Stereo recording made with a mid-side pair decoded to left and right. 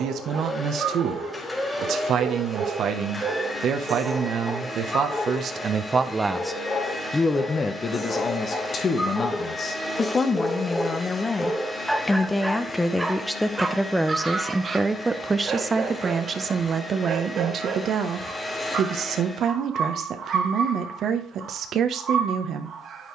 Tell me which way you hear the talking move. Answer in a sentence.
In this clip you hear the talking go left and come back.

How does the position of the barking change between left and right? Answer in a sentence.
You can hear the barking move from right to left and back again.